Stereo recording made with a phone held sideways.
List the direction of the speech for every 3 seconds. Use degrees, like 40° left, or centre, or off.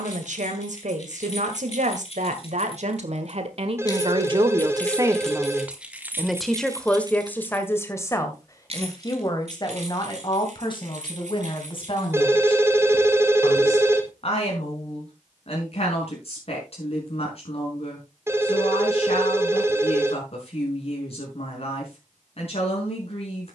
60° right, 30° right, 10° left, 30° left, 40° left, 50° left, 50° left, 50° left.